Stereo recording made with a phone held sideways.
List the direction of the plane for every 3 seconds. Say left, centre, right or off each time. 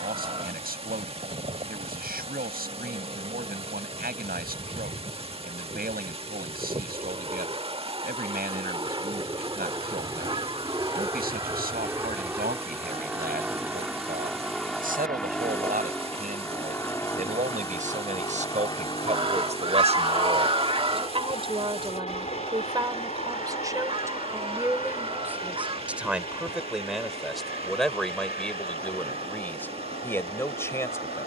right, right, right, right, centre, centre, left, left, left, left, left.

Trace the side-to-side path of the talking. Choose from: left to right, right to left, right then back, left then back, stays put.
right to left.